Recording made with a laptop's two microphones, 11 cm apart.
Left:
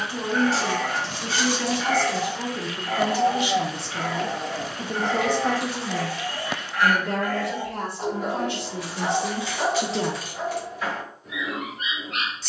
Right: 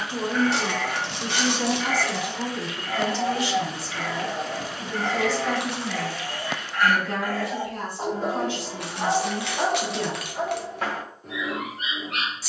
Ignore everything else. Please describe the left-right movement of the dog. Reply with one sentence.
In this clip you hear the dog go from the left side to the right.